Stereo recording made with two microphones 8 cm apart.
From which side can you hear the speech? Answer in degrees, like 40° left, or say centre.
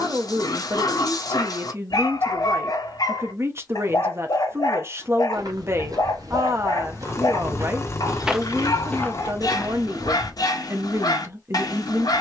40° right.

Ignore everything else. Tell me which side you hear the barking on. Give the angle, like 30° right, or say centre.
60° left.